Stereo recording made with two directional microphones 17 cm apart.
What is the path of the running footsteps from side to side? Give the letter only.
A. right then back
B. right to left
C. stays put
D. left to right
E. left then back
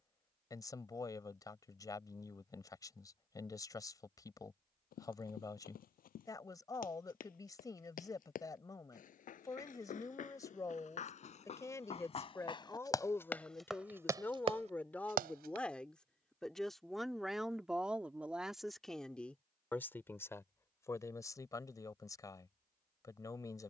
D.